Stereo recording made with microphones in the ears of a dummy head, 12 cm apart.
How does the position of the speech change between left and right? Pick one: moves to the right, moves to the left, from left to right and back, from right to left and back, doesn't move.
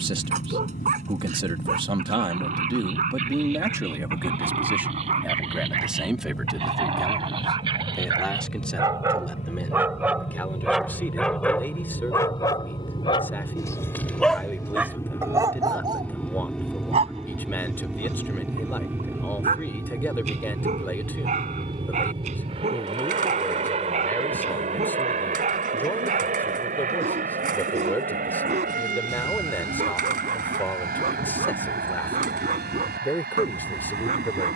moves to the left.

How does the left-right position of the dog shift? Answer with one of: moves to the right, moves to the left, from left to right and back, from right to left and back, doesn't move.
from right to left and back.